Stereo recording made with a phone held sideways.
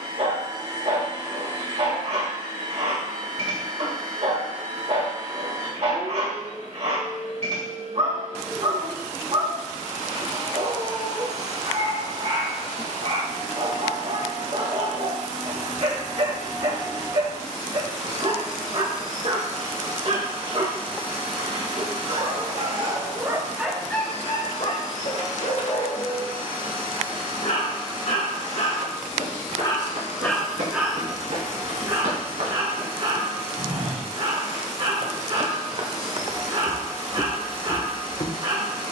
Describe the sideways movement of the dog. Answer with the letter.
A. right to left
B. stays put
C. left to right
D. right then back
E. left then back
E.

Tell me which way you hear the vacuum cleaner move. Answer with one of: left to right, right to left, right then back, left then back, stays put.
stays put.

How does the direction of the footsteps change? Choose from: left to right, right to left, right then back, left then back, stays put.
right to left.